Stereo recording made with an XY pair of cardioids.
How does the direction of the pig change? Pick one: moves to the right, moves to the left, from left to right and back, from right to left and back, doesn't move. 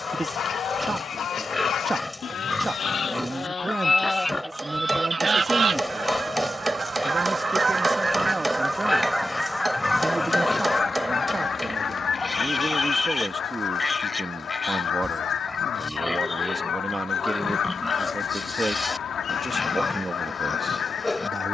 doesn't move.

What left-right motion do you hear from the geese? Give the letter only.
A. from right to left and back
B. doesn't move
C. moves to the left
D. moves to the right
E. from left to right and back
E.